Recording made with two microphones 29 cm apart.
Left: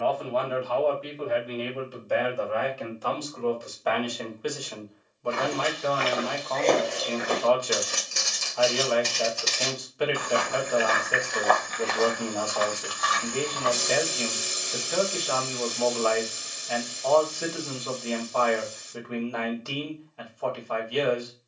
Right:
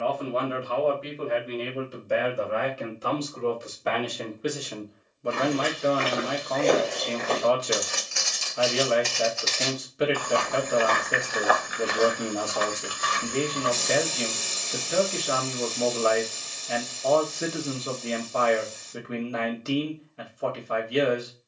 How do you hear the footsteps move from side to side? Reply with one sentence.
In this clip you hear the footsteps move from right to left and back again.